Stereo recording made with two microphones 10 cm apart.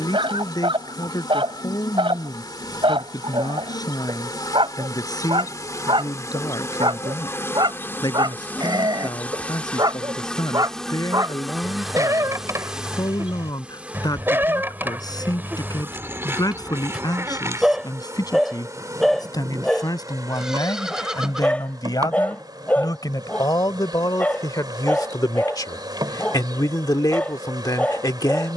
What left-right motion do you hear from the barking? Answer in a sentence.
You can hear the barking travel towards the left.